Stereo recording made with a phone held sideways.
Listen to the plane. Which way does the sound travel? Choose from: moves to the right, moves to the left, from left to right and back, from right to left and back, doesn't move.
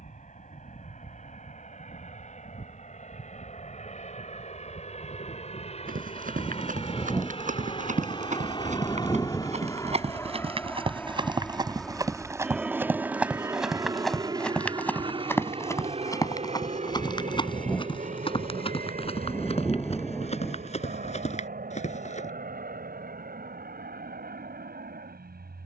moves to the right.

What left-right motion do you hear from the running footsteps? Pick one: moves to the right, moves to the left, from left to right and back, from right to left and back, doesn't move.
moves to the left.